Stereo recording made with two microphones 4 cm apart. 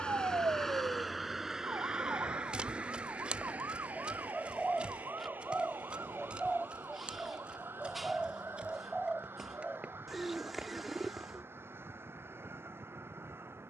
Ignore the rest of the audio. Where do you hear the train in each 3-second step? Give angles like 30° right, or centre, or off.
10° right, 40° right, 50° right, 60° right, 60° right.